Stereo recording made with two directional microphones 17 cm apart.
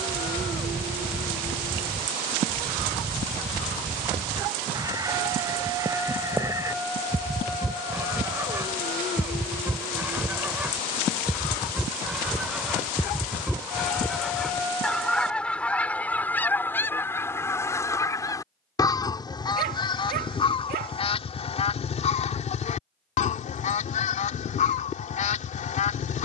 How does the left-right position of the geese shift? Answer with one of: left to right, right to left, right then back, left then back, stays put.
right to left.